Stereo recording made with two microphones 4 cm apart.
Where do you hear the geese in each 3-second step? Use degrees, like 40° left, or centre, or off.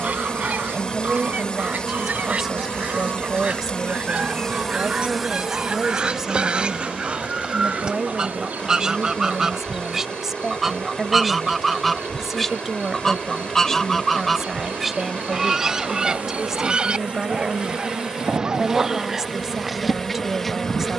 40° right, 30° right, 20° right, 10° right, 10° left, 20° right, 40° right.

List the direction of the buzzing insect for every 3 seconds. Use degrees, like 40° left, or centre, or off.
30° left, 10° left, 40° right, 60° right, 50° right, 40° right, 10° right.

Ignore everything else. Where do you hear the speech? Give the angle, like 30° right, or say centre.
10° right.